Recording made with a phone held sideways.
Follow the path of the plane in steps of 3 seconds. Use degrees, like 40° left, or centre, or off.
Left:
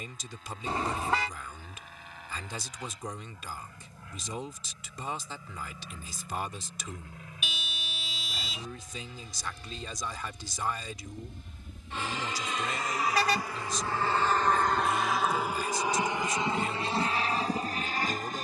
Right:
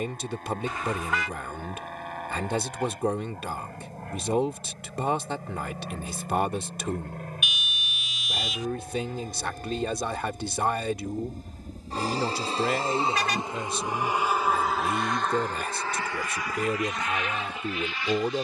80° right, 70° right, 70° right, 50° right, 20° right, 20° left.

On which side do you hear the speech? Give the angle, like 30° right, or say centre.
70° right.